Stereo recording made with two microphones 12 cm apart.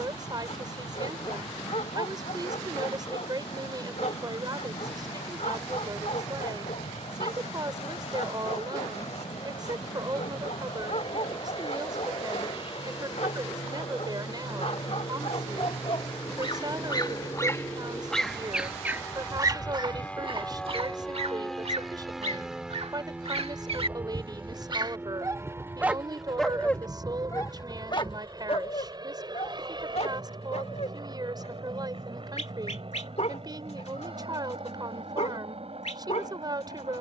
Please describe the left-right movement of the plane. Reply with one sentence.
You can hear the plane go from the left side to the right.